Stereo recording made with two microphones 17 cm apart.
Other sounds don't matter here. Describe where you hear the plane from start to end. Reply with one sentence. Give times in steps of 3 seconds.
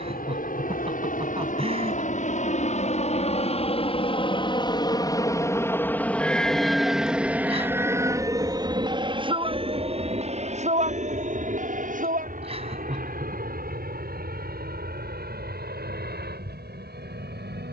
In this clip you hear the plane on the left from 0 s, in the centre from 6 s and on the right from 9 s.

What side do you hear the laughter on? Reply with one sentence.
You can hear the laughter on the right.